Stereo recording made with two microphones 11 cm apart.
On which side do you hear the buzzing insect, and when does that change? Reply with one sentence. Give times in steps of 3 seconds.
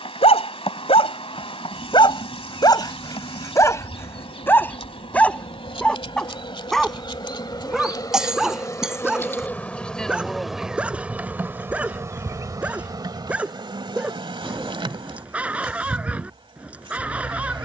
You can hear the buzzing insect on the left from 0 s, in the centre from 9 s and on the right from 12 s.